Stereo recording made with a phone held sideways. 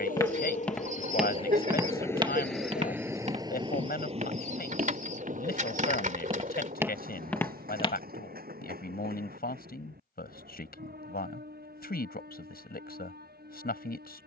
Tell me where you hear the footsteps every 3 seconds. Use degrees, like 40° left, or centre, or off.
10° right, 50° right, centre, off, off.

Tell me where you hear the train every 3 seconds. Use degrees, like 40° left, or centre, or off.
30° left, 40° right, 60° right, 70° right, 70° right.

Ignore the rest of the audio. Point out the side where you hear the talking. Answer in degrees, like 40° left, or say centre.
70° left.